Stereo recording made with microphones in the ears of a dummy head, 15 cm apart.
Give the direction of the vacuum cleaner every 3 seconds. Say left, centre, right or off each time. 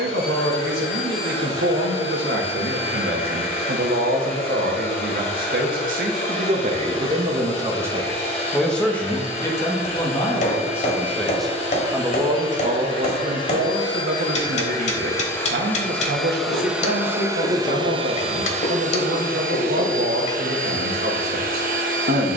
left, left, left, left, left, centre, right, right.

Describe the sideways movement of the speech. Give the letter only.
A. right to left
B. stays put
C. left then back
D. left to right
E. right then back
C.